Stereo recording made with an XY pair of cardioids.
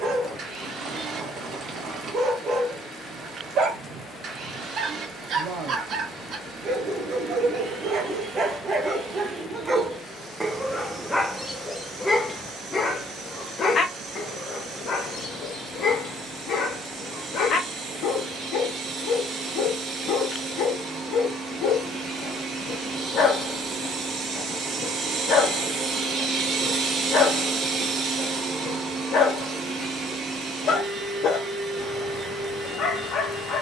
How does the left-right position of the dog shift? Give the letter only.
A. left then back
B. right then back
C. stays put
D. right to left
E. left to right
D.